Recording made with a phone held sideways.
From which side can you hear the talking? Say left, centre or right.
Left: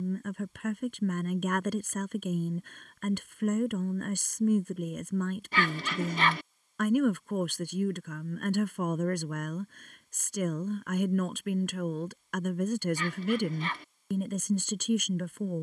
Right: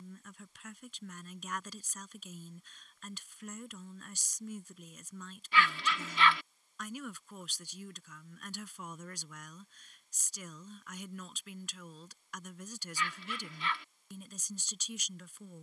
left.